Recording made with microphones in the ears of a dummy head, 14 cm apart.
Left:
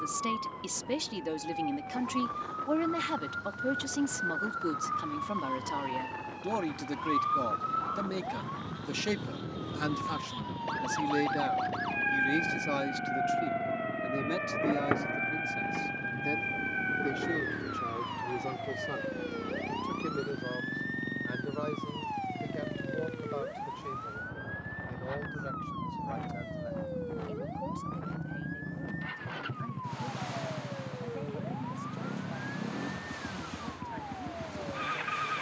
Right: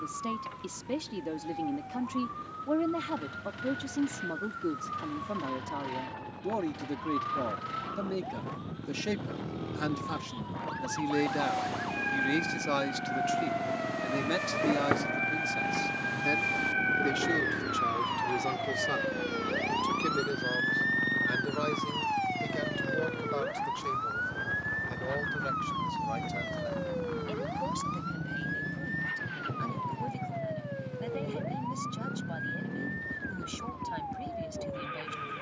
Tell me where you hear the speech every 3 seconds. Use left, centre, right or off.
left, left, left, centre, right, right, right, right, right, right, right, right.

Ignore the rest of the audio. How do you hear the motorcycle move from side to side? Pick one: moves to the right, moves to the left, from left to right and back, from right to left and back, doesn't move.
moves to the left.